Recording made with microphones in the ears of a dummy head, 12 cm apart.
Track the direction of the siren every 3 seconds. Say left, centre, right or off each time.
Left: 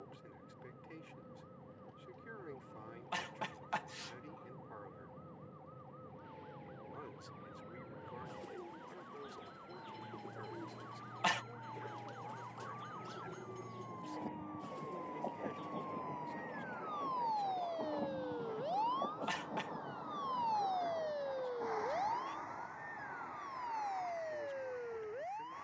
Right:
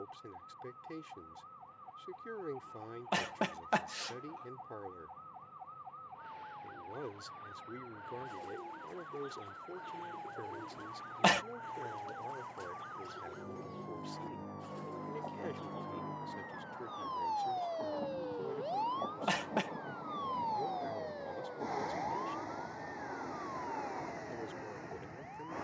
right, right, right, right, right, right, centre, left, left.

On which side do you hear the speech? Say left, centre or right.
right.